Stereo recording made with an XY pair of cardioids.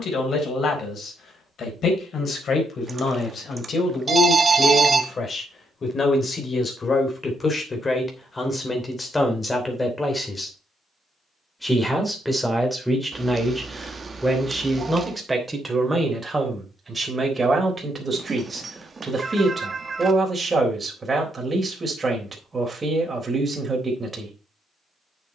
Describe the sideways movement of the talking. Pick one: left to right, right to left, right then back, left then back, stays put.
left to right.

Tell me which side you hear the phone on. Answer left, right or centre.
right.